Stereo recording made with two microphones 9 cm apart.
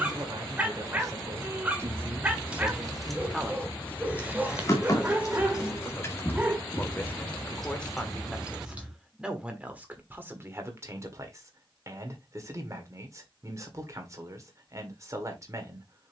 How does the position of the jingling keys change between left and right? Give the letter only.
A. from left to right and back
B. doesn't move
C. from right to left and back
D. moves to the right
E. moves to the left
C.